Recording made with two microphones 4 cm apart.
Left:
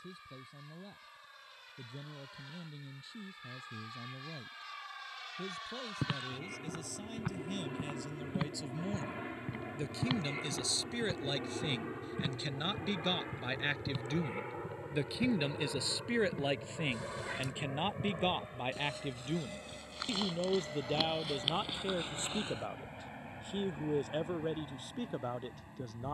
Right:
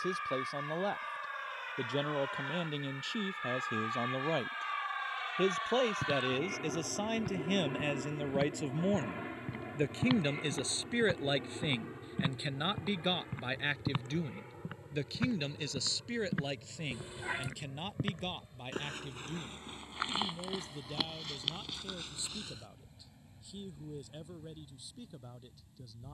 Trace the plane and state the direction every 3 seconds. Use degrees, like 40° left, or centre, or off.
50° right, 40° right, 20° right, 10° left, 30° left, 40° left, 50° left, 60° left, 60° left.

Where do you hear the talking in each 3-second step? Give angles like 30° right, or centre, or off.
70° right, 70° right, 50° right, 30° right, 10° right, 20° left, 40° left, 50° left, 50° left.